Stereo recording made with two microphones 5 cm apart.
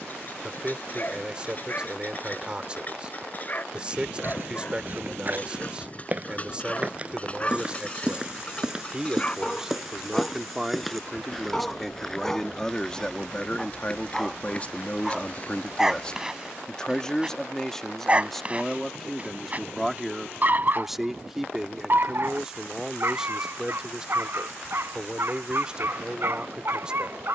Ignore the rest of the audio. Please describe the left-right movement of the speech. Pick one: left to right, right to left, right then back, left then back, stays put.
left then back.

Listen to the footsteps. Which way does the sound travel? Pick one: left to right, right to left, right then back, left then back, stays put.
right to left.